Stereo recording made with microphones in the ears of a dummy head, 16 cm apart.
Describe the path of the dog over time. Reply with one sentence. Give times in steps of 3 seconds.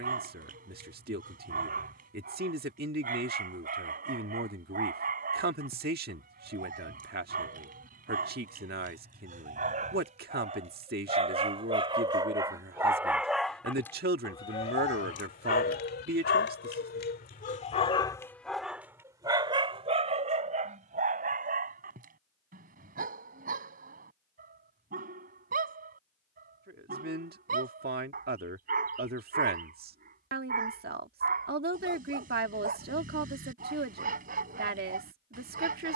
In this clip you hear the dog on the right from 0 s, in the centre from 12 s, on the left from 15 s and on the right from 18 s.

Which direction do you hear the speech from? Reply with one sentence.
You can hear the speech on the right.